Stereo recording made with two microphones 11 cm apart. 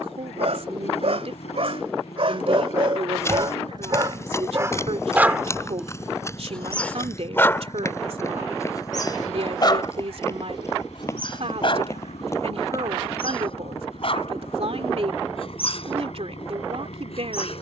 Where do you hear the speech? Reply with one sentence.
In this clip you hear the speech on the right.